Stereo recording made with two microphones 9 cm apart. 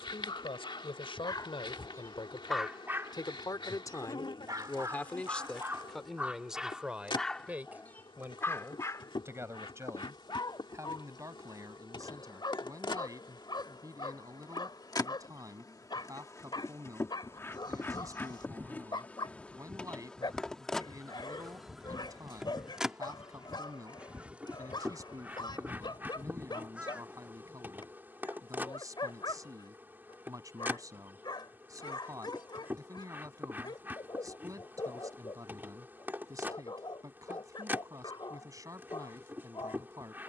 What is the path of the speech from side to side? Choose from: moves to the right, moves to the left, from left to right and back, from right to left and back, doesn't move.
moves to the right.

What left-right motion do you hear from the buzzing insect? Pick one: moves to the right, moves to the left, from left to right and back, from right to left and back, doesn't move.
moves to the right.